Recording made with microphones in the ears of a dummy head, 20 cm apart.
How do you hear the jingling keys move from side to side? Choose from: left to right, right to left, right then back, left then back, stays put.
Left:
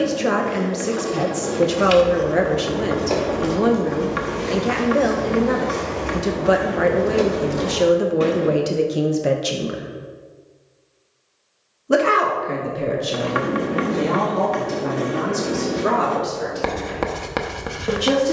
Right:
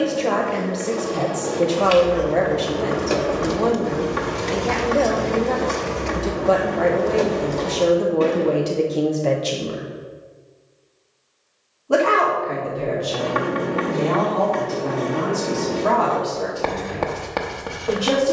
right then back.